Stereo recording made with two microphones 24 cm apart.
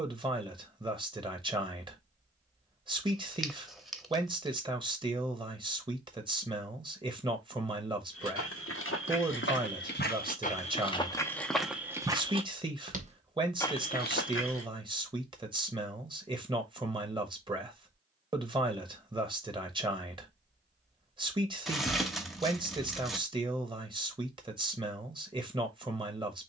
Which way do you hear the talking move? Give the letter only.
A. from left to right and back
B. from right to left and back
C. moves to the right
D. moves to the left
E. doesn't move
E.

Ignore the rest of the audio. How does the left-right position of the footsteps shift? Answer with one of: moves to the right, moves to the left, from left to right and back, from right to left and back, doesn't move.
from left to right and back.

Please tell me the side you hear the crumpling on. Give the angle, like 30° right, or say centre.
centre.